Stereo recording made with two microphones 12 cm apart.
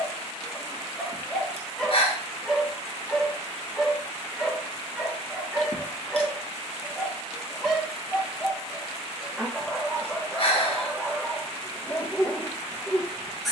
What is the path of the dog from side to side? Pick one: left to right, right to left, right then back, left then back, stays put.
stays put.